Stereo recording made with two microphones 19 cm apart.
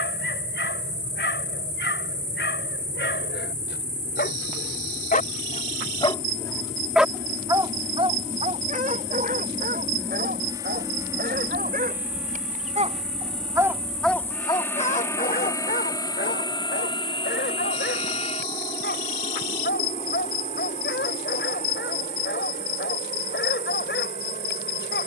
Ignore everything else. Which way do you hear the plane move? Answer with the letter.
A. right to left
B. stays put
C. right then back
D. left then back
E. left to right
A.